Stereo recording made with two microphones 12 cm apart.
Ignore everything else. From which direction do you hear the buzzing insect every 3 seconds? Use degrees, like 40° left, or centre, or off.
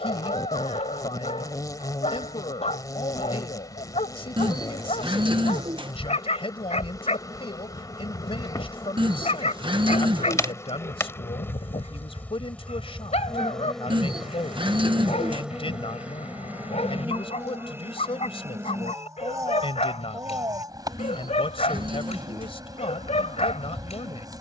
30° left, 30° left, 30° left, 20° left, 10° left, 10° right, 30° right, 30° right.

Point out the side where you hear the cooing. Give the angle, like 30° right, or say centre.
40° right.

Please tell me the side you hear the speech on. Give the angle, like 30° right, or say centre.
50° left.